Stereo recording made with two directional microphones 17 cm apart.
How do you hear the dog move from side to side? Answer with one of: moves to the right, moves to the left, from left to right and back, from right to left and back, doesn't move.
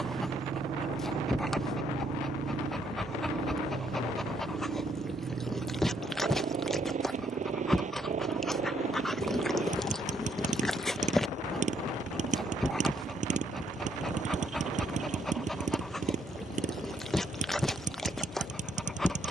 doesn't move.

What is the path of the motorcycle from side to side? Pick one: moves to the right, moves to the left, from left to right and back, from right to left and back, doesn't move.
doesn't move.